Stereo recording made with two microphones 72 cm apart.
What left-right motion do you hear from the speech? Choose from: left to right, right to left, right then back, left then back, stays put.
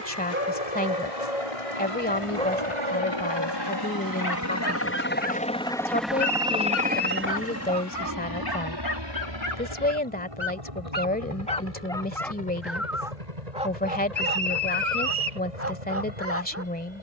stays put.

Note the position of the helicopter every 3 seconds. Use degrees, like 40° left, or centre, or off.
50° left, 20° left, 20° right, 40° right, 50° right, 60° right.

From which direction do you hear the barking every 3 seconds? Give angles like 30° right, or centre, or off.
centre, 30° left, 30° left, 20° left, 10° right, 20° right.